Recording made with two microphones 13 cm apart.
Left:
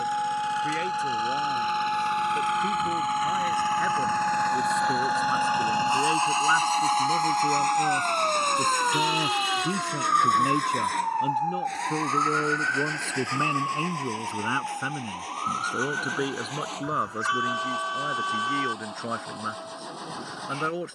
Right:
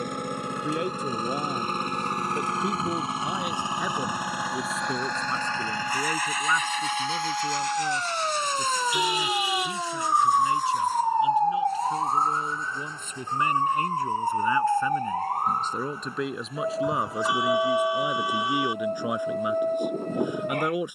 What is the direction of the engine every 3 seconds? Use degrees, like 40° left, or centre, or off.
50° right, 10° right, 40° left, 70° left, 80° left, 80° left, 80° left.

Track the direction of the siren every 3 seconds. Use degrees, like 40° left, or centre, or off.
60° left, 40° left, 10° left, 10° right, 40° right, 50° right, 60° right.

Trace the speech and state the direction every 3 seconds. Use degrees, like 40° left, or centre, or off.
20° right, centre, 20° left, 50° left, 30° left, centre, 10° right.